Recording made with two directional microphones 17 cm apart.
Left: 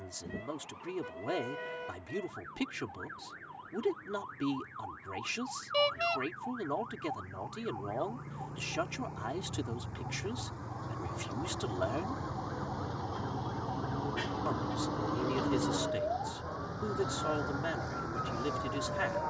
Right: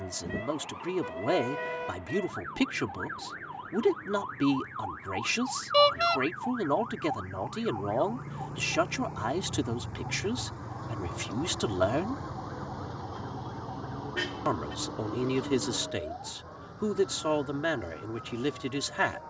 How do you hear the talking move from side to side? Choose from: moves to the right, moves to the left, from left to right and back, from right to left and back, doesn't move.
doesn't move.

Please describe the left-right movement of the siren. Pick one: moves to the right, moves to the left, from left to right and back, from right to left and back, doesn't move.
moves to the left.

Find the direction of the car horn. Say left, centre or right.
right.